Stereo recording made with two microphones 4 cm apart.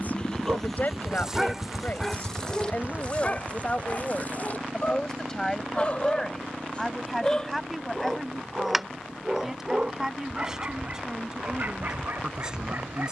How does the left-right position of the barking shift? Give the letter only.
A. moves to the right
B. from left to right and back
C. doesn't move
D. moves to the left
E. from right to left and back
E.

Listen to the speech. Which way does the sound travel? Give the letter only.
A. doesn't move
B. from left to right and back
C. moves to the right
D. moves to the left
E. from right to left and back
C.